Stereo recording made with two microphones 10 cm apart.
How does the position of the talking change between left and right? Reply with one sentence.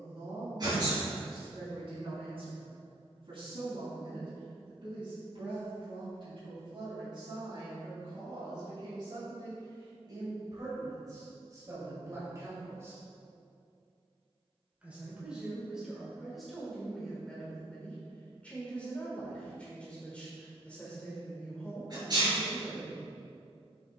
You can hear the talking travel towards the left.